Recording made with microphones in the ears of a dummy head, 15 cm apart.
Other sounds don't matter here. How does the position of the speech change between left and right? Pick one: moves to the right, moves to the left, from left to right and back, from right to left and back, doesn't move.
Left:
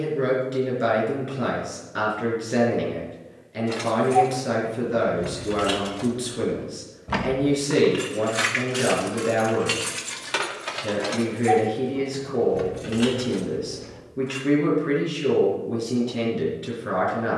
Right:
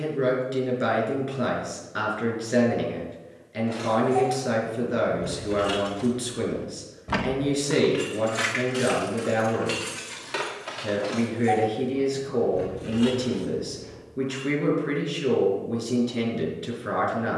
doesn't move.